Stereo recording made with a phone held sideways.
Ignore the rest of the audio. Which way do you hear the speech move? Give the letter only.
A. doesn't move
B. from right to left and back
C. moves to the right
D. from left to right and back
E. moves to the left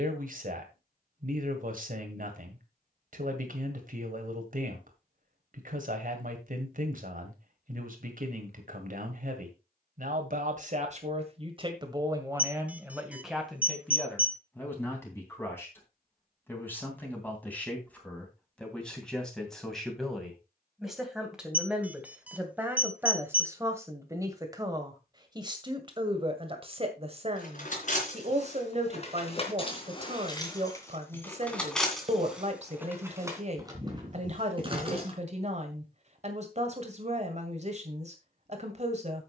B.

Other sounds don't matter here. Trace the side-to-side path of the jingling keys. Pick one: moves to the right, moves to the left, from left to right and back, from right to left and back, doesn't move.
moves to the right.